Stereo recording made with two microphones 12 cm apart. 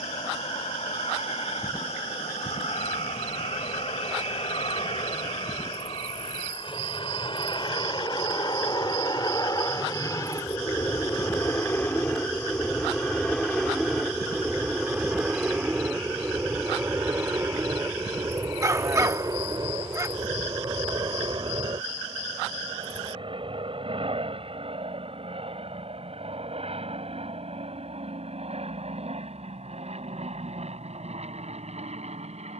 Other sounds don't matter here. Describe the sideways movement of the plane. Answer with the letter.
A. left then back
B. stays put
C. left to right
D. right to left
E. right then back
C.